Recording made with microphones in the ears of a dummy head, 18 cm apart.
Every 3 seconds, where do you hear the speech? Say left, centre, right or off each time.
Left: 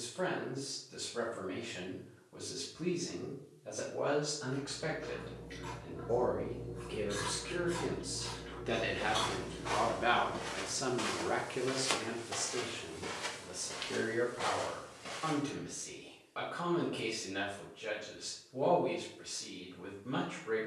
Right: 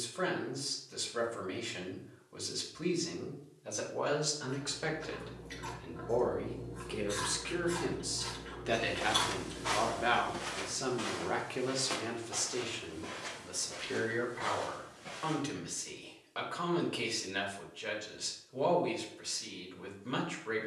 right, right, right, centre, right, right, right.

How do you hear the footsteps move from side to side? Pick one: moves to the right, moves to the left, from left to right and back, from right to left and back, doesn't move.
moves to the left.